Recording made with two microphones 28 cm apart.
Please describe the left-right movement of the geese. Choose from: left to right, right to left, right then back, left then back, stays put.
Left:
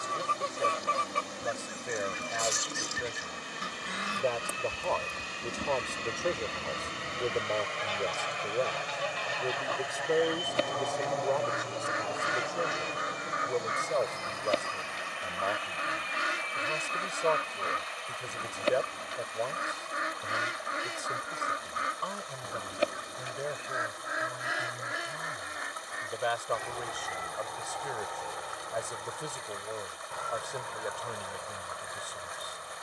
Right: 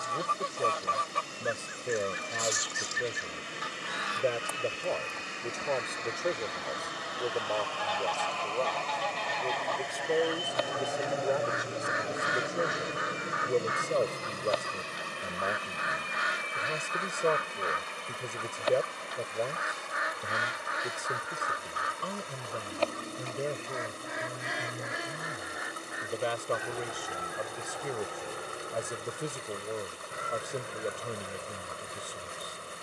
left to right.